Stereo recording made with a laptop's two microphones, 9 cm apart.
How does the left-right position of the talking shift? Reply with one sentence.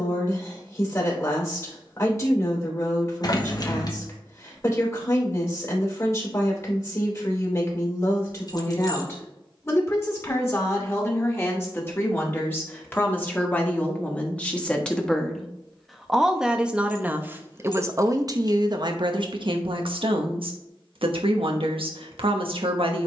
In this clip you hear the talking move to the right.